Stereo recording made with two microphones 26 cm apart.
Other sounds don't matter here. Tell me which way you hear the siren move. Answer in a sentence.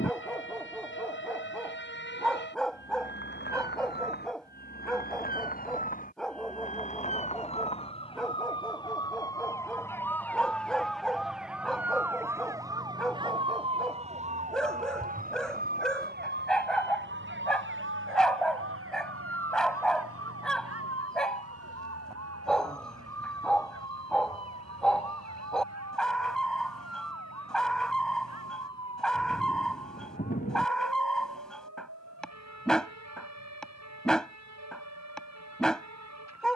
In this clip you hear the siren travel towards the right.